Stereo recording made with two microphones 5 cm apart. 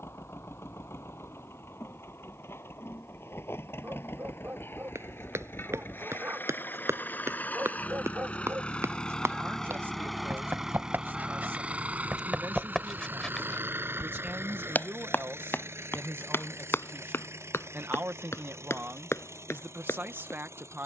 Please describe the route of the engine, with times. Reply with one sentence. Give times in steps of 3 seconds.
You can hear the engine on the left from 0 s, in the centre from 9 s and on the right from 12 s.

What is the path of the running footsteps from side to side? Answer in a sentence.
In this clip you hear the running footsteps go from the right side to the left.